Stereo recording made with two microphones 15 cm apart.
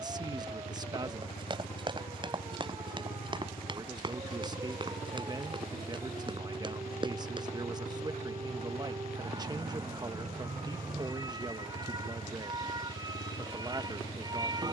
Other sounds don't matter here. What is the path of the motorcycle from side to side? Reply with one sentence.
In this clip you hear the motorcycle stay put.